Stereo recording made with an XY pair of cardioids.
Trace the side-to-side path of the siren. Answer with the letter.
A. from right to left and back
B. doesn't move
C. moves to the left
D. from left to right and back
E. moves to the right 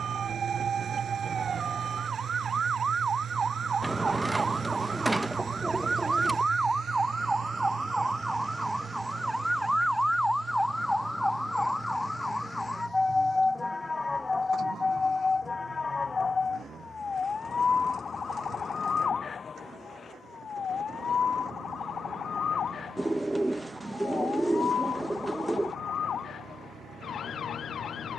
C.